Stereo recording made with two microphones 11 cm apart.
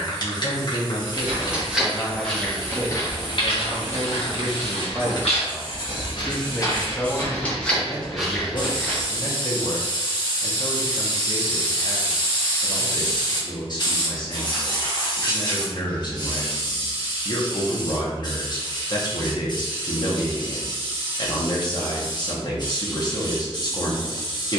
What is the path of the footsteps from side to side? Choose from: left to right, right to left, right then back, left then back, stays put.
left then back.